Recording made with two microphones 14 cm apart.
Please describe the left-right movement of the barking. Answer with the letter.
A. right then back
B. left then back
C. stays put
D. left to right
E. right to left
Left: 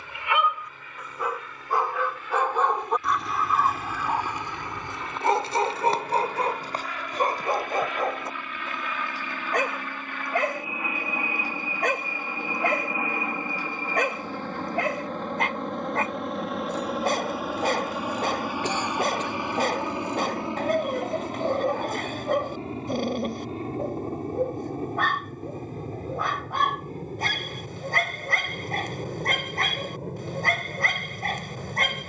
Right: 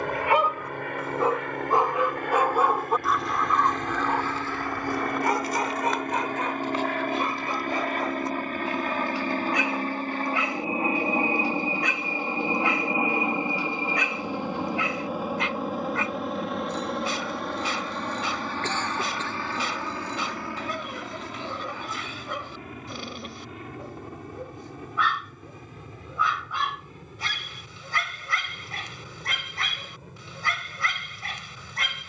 E.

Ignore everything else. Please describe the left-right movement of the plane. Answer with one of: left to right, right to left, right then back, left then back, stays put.
right to left.